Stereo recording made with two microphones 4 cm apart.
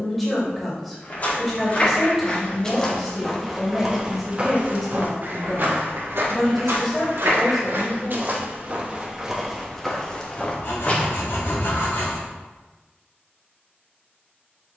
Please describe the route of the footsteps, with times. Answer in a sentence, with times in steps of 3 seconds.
In this clip you hear the footsteps on the left from 0 s, on the right from 3 s, in the centre from 9 s and not at all from 12 s.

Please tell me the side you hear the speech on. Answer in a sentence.
In this clip you hear the speech in the centre.